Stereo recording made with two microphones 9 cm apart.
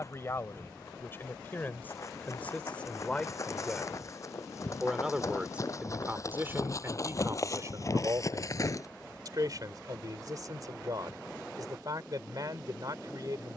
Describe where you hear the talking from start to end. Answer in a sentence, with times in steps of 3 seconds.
In this clip you hear the talking on the left from 0 s, in the centre from 3 s and on the right from 6 s.